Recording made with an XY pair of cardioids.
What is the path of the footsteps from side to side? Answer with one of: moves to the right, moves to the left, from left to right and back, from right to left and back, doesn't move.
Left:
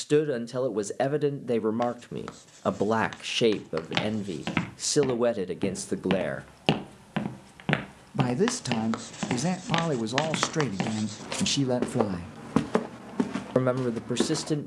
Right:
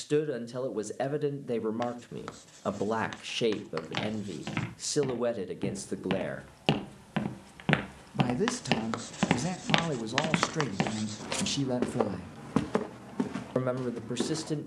from left to right and back.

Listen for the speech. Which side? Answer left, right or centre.
left.